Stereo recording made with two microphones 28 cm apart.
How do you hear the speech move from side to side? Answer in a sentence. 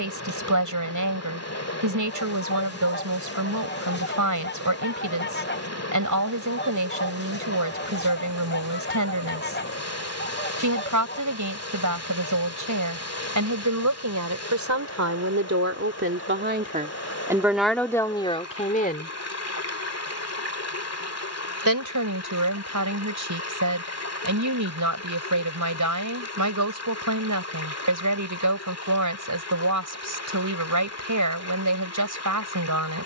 In this clip you hear the speech go left and come back.